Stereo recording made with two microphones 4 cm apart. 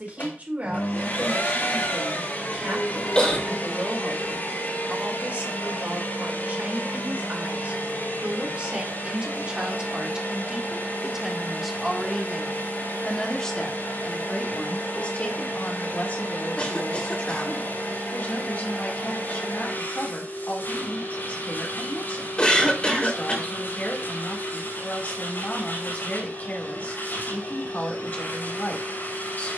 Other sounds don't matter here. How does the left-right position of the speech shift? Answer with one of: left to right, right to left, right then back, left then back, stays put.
right to left.